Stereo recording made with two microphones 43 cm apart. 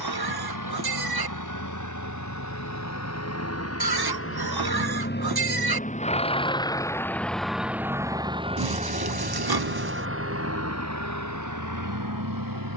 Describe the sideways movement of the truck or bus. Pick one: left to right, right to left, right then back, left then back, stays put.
left to right.